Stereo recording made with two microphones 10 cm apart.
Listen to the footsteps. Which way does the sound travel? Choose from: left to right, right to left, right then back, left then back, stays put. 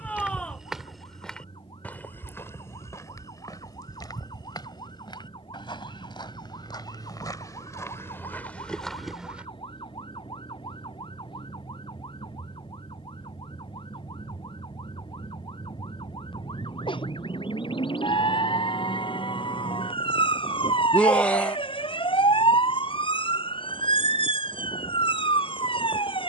left then back.